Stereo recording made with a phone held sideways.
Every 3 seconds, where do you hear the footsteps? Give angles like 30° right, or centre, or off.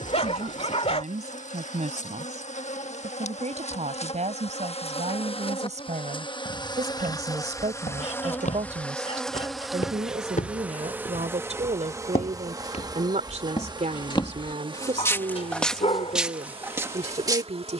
off, off, 80° left, 70° left, 50° left, 10° right.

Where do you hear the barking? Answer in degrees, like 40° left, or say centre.
50° left.